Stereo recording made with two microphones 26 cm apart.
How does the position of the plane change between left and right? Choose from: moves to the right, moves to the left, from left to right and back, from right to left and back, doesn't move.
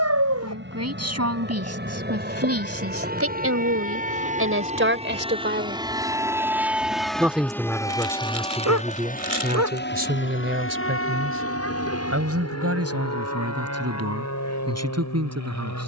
moves to the left.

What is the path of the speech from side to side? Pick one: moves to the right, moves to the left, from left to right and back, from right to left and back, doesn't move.
from right to left and back.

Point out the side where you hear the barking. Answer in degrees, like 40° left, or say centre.
80° right.